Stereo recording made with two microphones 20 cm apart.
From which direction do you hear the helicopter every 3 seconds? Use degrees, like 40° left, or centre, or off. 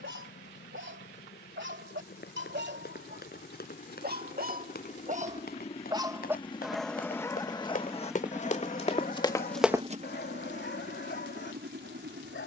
60° left, 40° left, 10° left, 40° right.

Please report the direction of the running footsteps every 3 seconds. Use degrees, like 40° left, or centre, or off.
50° left, 50° left, 40° left, centre.